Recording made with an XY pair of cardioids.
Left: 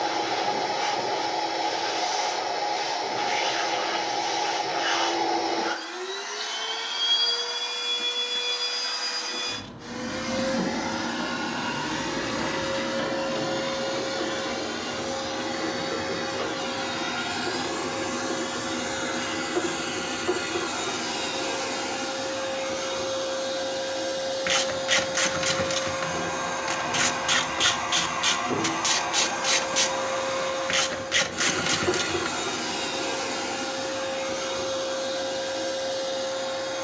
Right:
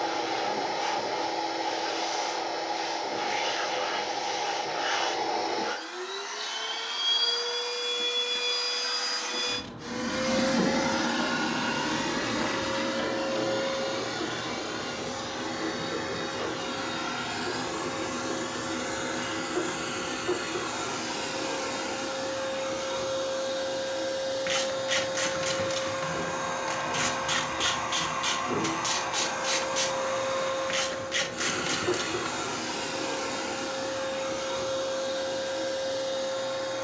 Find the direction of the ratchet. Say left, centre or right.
left.